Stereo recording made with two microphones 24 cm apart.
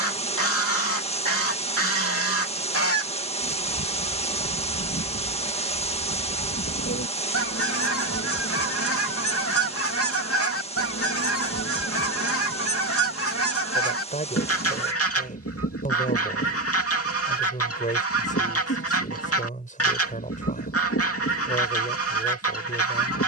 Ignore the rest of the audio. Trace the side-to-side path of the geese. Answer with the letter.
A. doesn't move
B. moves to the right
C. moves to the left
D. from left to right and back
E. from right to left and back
A.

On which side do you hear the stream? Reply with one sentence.
You can hear the stream on the left.